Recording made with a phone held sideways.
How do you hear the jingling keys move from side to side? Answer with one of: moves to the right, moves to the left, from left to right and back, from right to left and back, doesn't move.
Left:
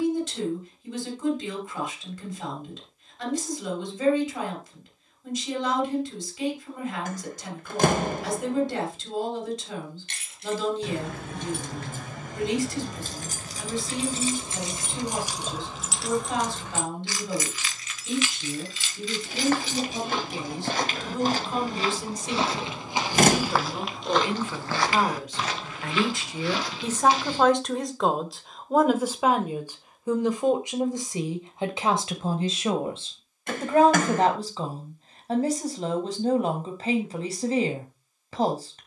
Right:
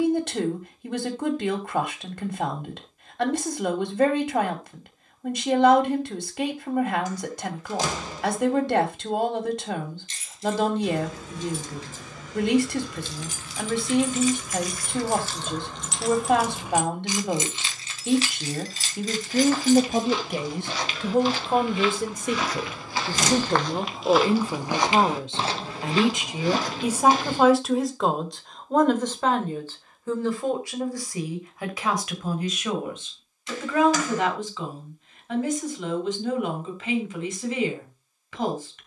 moves to the right.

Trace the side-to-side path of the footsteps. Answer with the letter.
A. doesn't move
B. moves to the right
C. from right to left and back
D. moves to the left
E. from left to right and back
B.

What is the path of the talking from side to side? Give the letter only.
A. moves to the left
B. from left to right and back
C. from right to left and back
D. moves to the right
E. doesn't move
A.